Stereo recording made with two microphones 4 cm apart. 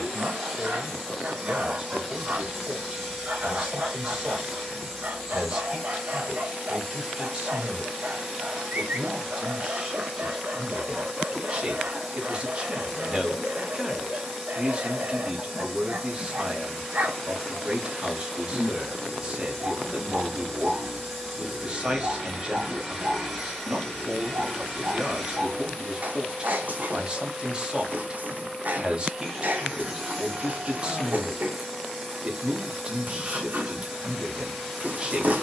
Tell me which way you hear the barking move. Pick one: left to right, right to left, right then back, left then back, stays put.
stays put.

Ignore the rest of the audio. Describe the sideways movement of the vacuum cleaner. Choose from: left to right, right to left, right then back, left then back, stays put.
stays put.